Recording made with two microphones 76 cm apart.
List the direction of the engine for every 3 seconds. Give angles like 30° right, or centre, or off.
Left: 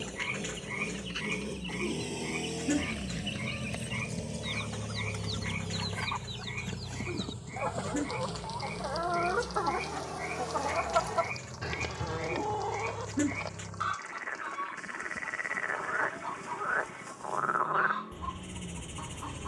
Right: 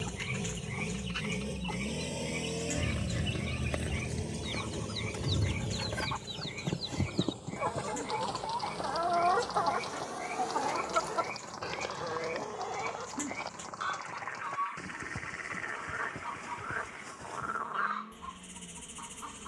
20° right, 20° left, 40° left, 60° left, 60° left, 70° left, 70° left.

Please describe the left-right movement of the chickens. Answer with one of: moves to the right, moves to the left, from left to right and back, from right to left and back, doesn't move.
moves to the left.